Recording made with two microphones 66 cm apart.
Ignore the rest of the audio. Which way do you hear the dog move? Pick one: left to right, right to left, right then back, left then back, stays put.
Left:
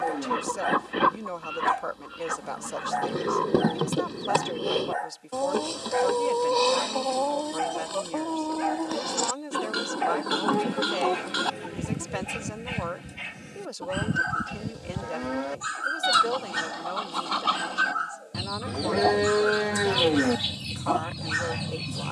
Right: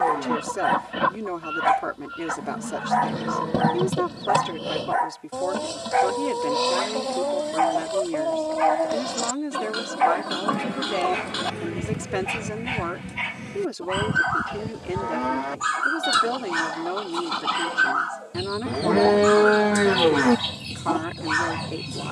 stays put.